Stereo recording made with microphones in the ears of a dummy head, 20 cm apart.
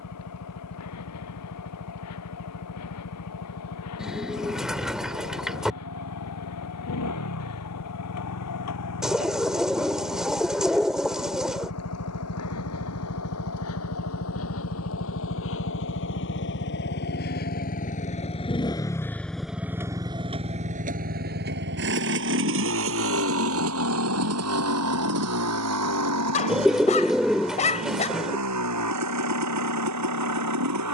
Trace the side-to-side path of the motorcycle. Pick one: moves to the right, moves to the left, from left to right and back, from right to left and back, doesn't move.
moves to the right.